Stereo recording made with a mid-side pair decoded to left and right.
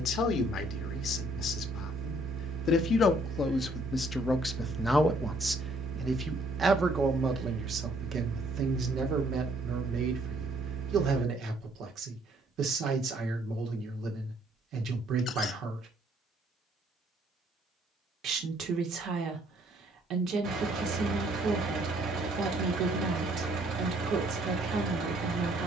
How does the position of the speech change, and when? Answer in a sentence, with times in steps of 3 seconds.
You can hear the speech on the left from 0 s, in the centre from 3 s and on the right from 6 s.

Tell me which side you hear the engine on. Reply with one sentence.
You can hear the engine on the right.